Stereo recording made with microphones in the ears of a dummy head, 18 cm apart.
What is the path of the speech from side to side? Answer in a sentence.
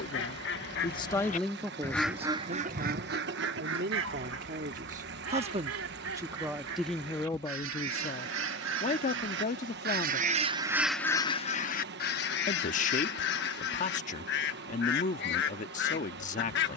You can hear the speech move from left to right and back again.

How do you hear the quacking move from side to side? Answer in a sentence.
In this clip you hear the quacking move from left to right and back again.